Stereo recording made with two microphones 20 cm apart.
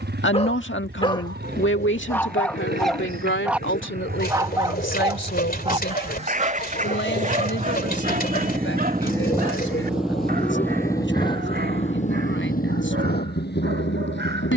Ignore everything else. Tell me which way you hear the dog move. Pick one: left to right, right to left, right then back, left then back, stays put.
left to right.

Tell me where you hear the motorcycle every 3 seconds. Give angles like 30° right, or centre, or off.
60° right, 50° right, 40° right, 10° left, 50° left.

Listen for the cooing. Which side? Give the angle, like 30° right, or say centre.
50° left.